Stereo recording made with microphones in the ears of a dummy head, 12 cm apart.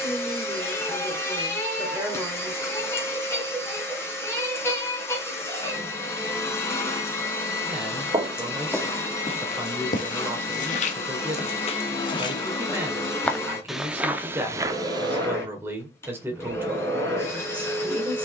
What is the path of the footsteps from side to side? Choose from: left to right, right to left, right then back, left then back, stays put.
left then back.